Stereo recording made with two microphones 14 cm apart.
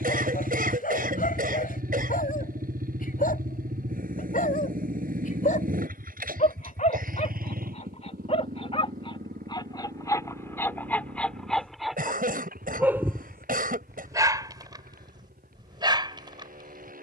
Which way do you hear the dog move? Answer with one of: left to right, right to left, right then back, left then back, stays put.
left to right.